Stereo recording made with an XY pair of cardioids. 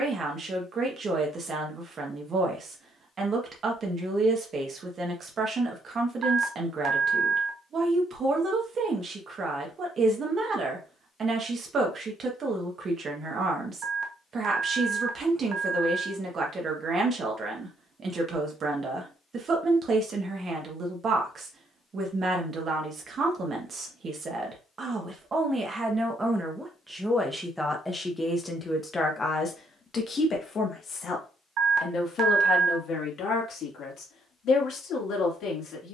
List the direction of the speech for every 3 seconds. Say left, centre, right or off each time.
right, right, right, right, right, right, right, right, right, centre, left, left.